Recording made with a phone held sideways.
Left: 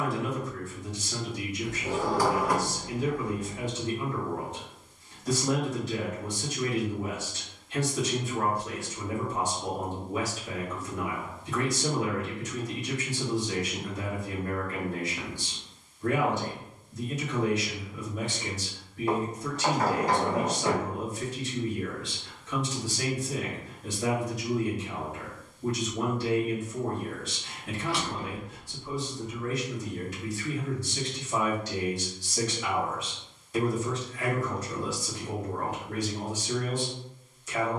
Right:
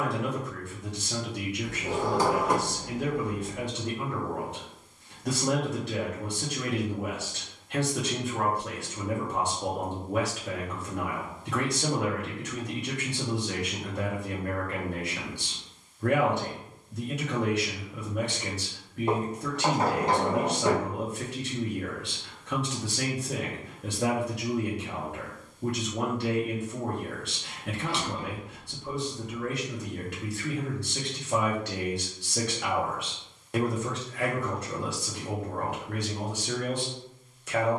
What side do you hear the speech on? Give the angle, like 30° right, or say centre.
80° right.